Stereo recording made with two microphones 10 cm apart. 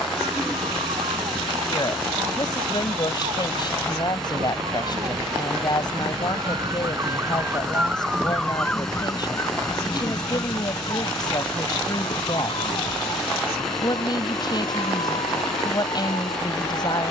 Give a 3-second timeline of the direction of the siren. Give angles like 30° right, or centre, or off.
80° right, 60° right, 20° right, 40° left, 60° left, 70° left.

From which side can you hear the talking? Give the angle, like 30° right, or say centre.
40° left.